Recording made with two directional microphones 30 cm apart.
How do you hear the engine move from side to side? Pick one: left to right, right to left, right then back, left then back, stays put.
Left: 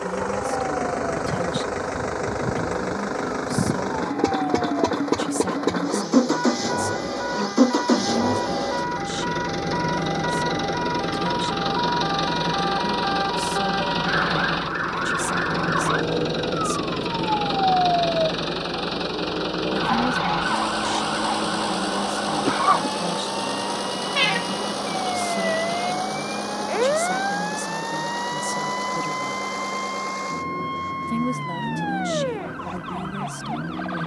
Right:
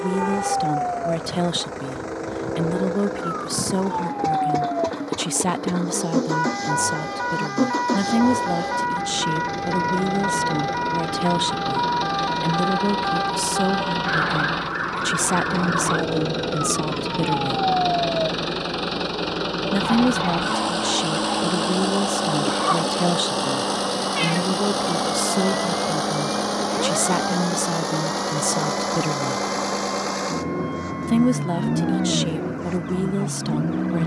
left to right.